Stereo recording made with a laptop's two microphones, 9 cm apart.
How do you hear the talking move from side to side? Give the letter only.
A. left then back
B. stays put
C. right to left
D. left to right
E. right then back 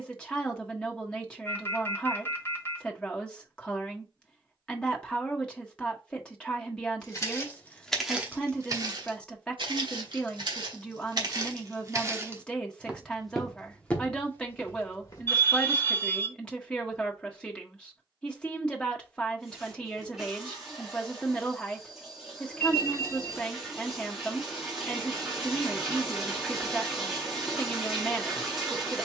B.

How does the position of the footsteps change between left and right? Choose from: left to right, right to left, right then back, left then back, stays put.
right then back.